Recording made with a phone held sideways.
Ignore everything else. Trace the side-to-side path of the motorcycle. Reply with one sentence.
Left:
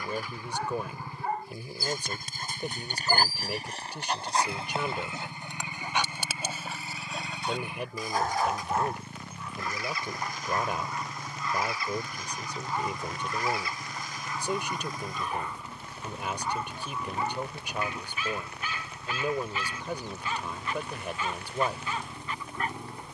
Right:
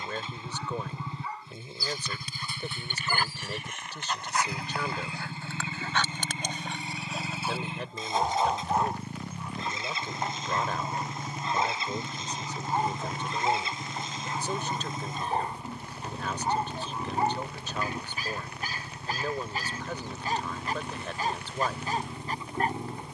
In this clip you hear the motorcycle stay put.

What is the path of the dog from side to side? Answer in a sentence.
In this clip you hear the dog move to the right.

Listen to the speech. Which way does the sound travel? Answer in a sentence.
In this clip you hear the speech stay in one place.